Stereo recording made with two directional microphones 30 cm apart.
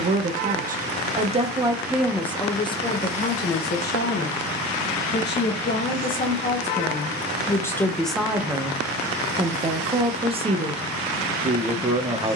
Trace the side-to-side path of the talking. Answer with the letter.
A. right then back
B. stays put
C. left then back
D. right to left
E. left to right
C.